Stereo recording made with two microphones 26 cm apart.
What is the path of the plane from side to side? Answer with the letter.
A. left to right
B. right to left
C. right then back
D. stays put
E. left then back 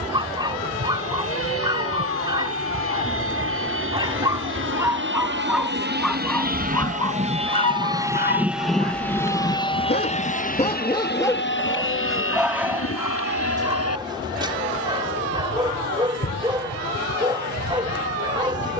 B.